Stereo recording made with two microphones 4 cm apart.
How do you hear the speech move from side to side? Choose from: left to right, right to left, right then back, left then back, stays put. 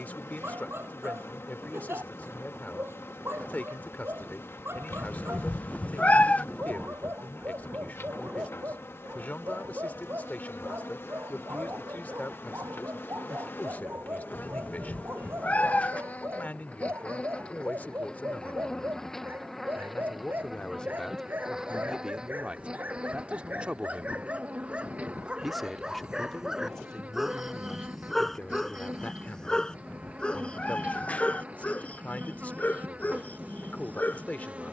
right then back.